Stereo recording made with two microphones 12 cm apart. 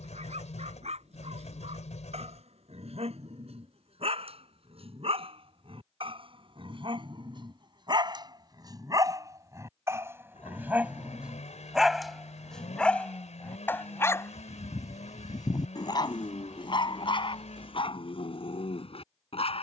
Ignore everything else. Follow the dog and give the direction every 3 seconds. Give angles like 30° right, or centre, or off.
60° right, 60° right, 40° right, 20° right, 20° left, 40° left, 50° left.